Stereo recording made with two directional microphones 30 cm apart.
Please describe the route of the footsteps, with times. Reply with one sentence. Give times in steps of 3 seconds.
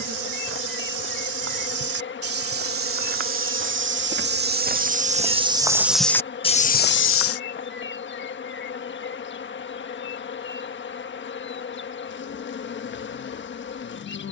You can hear the footsteps on the right from 0 s, on the left from 6 s and not at all from 9 s.